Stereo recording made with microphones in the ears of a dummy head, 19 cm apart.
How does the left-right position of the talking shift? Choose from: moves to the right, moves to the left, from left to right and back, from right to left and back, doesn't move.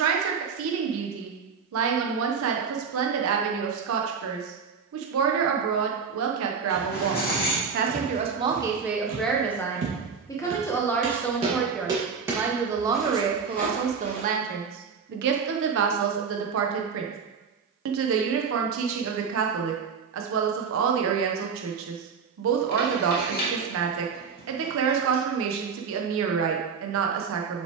from right to left and back.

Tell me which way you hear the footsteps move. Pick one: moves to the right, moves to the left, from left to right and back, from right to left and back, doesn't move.
moves to the left.